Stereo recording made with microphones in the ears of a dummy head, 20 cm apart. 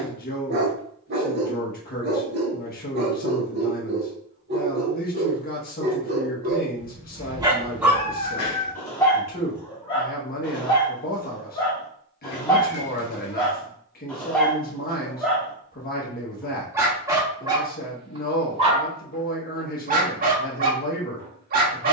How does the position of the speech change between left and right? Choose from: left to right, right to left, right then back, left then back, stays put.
stays put.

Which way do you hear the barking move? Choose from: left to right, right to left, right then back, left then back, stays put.
left then back.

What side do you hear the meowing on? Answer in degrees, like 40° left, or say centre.
50° left.